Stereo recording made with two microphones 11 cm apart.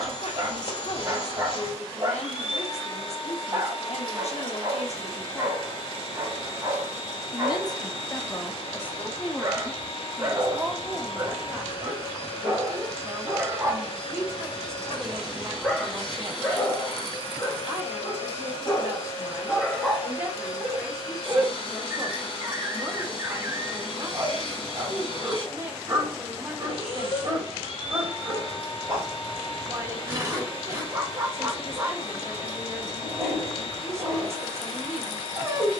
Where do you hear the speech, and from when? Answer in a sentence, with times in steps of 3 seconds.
You can hear the speech on the left from 0 s, in the centre from 9 s and on the right from 12 s.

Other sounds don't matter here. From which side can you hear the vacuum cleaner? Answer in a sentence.
You can hear the vacuum cleaner on the left.